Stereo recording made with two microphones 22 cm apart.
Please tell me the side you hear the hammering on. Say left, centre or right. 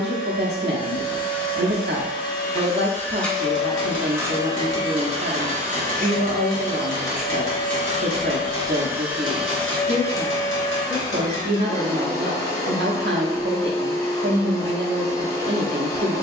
left.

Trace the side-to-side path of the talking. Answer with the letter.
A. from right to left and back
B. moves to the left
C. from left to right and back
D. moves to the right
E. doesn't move
E.